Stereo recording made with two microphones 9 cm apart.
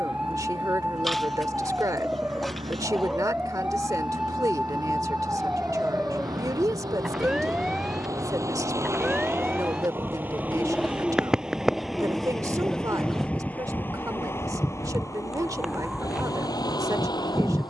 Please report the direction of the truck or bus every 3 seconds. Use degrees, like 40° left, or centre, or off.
60° right, 50° right, 40° right, 20° right, 20° left, 40° left.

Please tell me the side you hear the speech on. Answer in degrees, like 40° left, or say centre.
40° right.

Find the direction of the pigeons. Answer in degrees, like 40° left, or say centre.
centre.